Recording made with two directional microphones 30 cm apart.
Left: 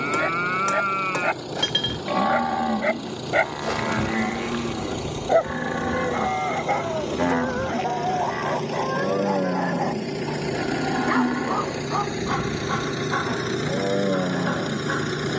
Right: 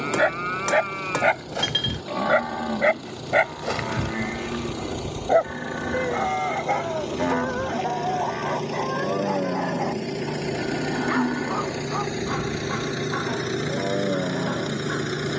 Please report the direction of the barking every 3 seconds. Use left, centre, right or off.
right, centre, left, left, left.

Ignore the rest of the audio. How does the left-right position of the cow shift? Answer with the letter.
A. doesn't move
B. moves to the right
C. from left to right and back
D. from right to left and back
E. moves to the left
A.